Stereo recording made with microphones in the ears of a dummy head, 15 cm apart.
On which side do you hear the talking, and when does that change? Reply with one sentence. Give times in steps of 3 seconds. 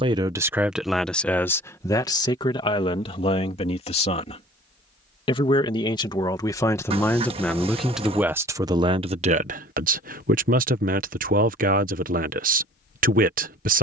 You can hear the talking in the centre from 0 s, on the left from 3 s, in the centre from 6 s and on the right from 9 s.